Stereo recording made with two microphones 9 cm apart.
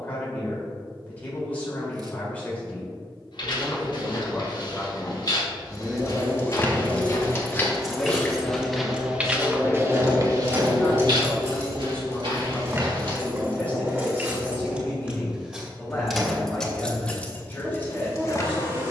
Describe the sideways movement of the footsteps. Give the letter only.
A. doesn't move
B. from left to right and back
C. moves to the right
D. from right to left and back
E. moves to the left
C.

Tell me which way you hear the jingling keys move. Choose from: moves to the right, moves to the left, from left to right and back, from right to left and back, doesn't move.
from left to right and back.